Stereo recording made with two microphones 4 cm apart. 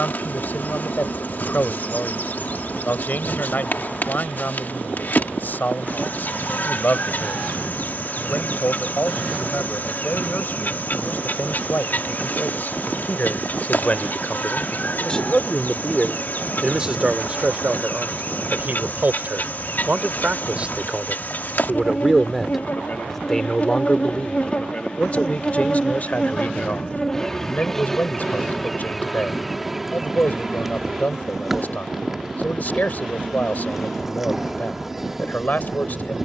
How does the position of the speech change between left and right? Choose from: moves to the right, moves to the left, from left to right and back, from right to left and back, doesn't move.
from left to right and back.